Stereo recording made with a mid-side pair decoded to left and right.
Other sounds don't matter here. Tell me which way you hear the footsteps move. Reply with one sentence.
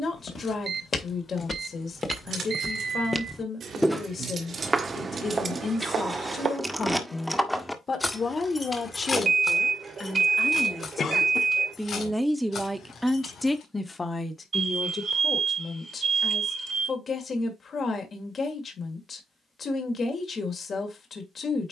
In this clip you hear the footsteps go from the left side to the right.